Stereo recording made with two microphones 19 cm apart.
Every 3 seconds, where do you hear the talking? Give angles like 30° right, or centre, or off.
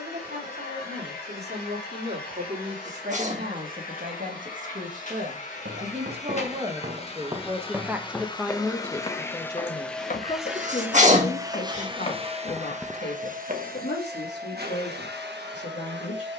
60° right, 50° right, 10° right, 30° left, 60° left, 70° left.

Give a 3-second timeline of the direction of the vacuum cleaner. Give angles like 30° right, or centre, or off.
50° left, 50° left, 30° left, centre, 50° right, 70° right.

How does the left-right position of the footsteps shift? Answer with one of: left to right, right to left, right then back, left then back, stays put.
left then back.